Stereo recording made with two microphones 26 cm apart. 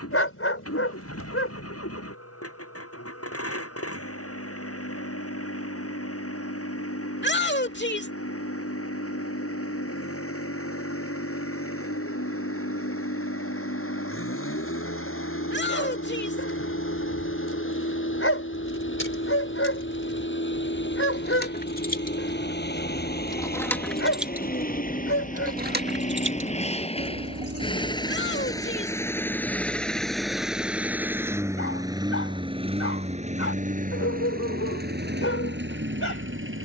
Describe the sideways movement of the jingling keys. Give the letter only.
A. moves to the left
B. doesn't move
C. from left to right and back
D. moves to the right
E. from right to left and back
D.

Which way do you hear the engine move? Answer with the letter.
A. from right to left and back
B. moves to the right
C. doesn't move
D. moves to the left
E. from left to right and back
B.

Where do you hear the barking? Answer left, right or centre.
left.